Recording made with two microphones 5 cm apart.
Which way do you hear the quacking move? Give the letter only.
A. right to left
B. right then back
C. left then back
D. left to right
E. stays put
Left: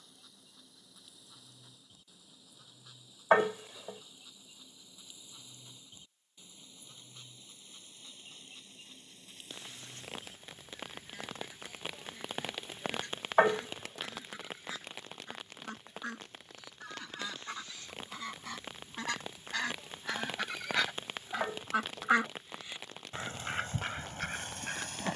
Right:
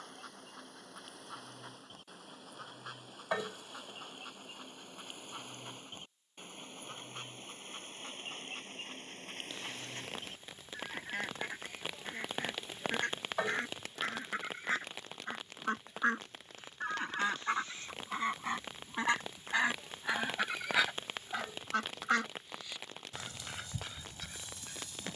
A.